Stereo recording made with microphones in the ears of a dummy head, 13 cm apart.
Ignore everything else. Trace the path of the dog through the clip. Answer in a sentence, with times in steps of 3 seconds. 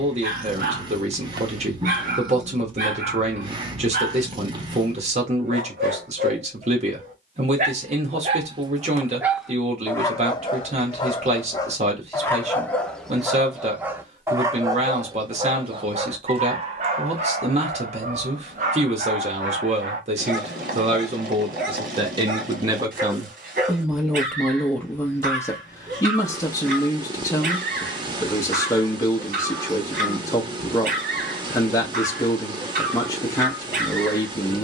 You can hear the dog on the right from 0 s, on the left from 9 s, in the centre from 12 s and on the right from 15 s.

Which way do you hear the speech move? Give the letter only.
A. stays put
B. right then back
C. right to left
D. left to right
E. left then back
C.